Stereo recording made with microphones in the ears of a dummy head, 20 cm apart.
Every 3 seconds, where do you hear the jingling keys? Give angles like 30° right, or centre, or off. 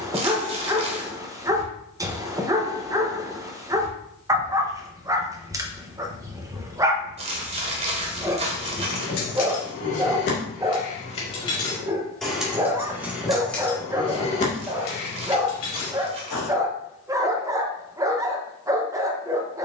off, off, 70° left, 40° left, 10° left, 60° left, off.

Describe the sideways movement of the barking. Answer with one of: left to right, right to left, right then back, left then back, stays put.
stays put.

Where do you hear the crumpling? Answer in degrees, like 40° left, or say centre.
30° right.